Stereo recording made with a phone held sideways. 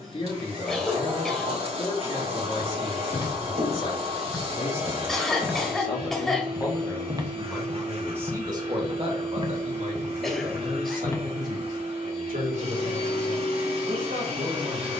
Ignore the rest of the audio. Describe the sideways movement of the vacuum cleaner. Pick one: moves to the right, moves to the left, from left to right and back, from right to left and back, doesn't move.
doesn't move.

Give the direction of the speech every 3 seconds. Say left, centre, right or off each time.
left, left, centre, right, right.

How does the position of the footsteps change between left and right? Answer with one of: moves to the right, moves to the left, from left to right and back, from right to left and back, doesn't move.
from left to right and back.